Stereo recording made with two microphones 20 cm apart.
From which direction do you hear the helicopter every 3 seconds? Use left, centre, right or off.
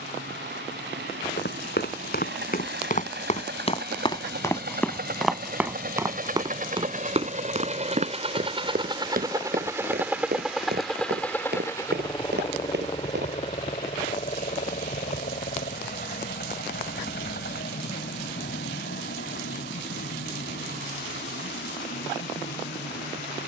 right, right, right, centre, left, left, left, left.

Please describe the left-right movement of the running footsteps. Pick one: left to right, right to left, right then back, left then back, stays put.
left to right.